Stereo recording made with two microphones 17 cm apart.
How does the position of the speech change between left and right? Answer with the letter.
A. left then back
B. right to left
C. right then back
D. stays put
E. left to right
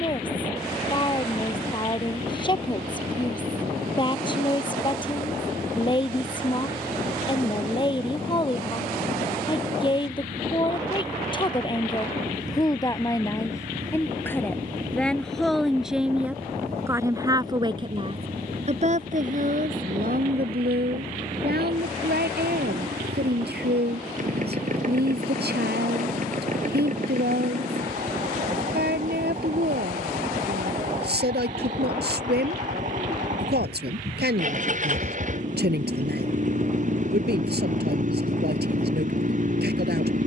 E.